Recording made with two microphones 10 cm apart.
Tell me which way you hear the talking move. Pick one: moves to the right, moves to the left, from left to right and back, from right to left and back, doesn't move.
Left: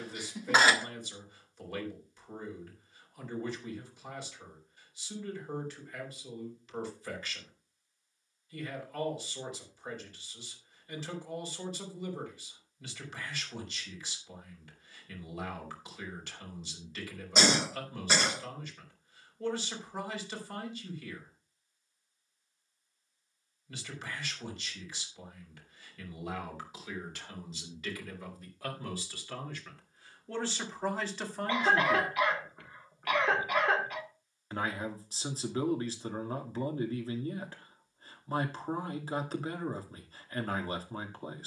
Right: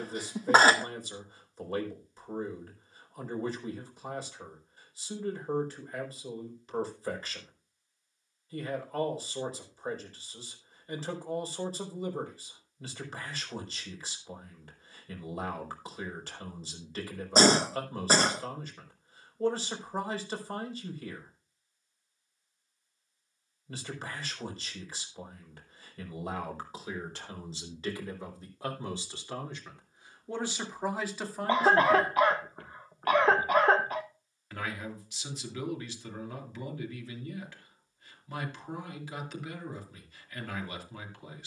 moves to the left.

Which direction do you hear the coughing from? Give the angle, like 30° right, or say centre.
40° right.